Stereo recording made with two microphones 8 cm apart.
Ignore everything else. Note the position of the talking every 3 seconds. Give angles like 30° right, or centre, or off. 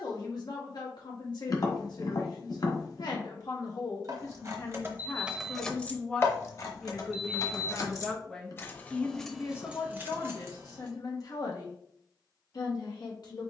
60° left, 40° left, centre, 40° left, 60° left.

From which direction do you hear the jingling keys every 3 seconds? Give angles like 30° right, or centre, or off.
off, 20° right, 50° left, 20° right, off.